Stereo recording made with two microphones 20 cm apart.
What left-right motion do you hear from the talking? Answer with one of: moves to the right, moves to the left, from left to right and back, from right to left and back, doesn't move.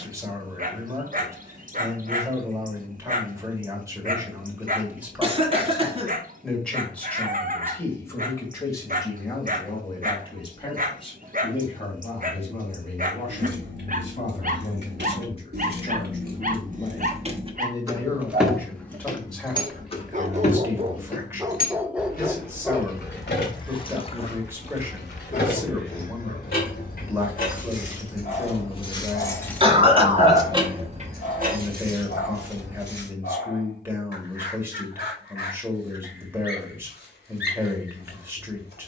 from right to left and back.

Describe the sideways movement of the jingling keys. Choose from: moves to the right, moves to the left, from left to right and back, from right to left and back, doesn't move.
from right to left and back.